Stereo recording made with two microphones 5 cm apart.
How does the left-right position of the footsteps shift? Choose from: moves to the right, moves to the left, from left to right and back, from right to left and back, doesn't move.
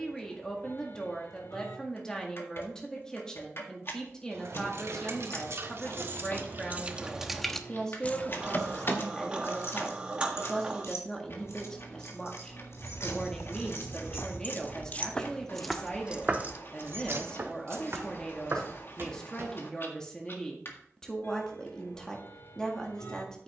moves to the right.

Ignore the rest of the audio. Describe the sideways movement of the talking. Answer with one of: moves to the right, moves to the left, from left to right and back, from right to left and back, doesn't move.
doesn't move.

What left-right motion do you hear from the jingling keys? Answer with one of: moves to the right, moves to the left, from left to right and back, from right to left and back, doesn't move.
from right to left and back.